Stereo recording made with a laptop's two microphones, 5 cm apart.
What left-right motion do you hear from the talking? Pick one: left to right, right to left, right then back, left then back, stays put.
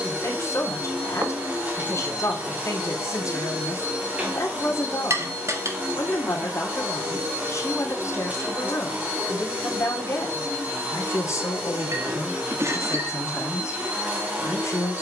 stays put.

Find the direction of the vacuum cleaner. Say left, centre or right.
right.